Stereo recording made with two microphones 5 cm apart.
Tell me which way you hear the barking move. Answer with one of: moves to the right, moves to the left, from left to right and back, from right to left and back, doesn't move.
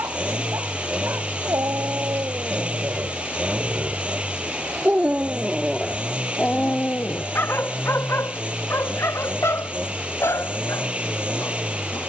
moves to the left.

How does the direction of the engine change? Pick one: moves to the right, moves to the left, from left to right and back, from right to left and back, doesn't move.
doesn't move.